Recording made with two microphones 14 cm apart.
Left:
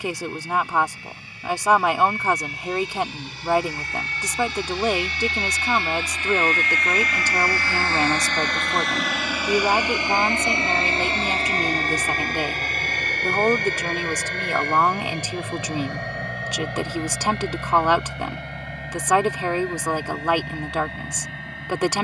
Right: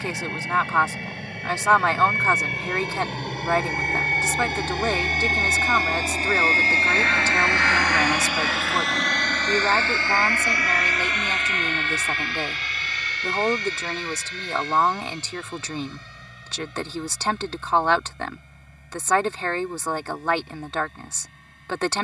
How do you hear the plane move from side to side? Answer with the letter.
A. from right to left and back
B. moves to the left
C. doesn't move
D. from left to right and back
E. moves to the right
B.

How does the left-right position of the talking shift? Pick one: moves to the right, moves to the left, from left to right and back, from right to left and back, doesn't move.
doesn't move.